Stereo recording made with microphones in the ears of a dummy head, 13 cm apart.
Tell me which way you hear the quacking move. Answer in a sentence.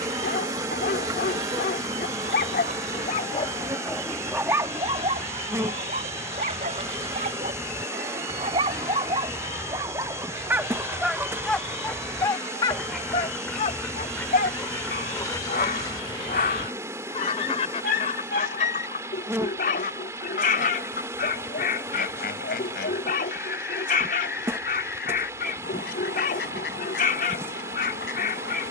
In this clip you hear the quacking move to the left.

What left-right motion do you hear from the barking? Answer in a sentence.
You can hear the barking move from left to right and back again.